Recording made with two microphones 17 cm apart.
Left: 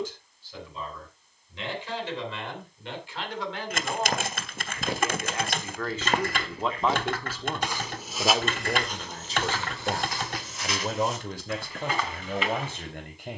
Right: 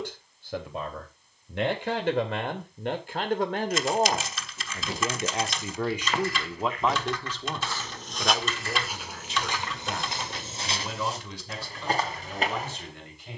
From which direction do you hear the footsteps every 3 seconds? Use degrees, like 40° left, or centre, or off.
off, 60° left, 20° left, 30° right, 40° right.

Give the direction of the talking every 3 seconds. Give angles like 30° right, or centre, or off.
60° right, 40° right, 10° left, 50° left, 60° left.